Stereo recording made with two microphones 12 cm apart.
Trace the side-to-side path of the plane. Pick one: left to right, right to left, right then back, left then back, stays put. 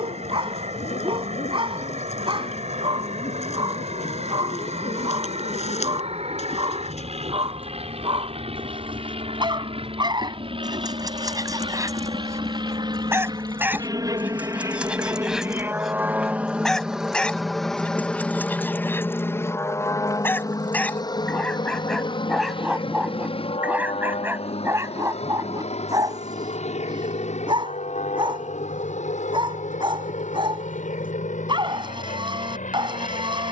right to left.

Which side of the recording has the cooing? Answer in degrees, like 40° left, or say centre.
70° left.